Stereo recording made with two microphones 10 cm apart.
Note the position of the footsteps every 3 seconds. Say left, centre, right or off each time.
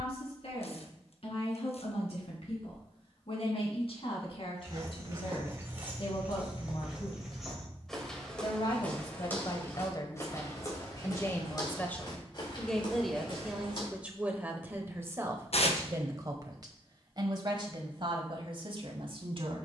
off, right, centre, left, left, off, off.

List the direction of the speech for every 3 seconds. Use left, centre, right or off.
left, left, left, left, centre, right, right.